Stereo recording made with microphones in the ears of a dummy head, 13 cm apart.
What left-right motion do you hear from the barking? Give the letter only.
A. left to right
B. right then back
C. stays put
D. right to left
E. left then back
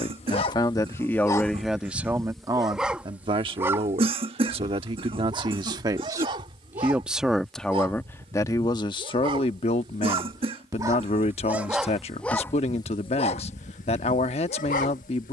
B.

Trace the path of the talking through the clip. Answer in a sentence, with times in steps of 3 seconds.
You can hear the talking in the centre from 0 s, on the right from 3 s, in the centre from 6 s and on the left from 9 s.